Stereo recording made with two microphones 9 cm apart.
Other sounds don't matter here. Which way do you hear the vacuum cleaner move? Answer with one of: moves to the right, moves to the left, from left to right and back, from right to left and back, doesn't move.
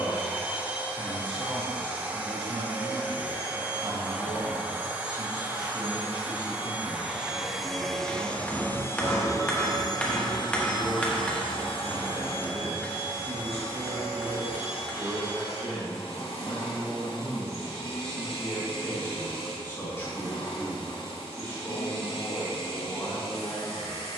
moves to the left.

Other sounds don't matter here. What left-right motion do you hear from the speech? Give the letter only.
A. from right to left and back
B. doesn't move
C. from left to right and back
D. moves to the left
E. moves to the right
D.